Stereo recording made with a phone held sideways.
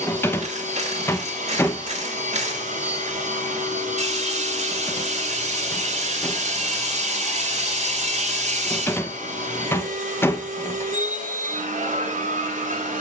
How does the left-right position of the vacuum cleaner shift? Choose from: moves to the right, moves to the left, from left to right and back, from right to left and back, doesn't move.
doesn't move.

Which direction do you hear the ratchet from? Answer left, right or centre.
right.